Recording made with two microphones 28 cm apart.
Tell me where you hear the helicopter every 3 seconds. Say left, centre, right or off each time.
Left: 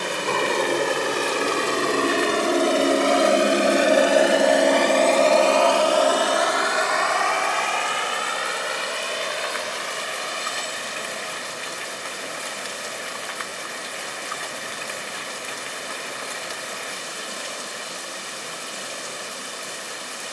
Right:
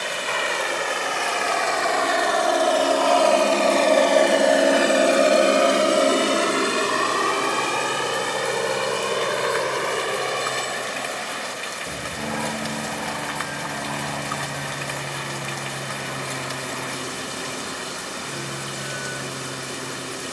left, centre, right, right, right, right, right.